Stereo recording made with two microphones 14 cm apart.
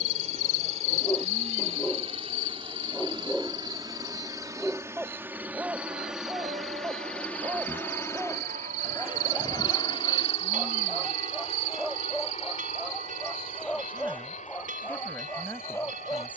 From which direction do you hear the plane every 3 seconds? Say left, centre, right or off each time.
right, right, centre, left, left, left.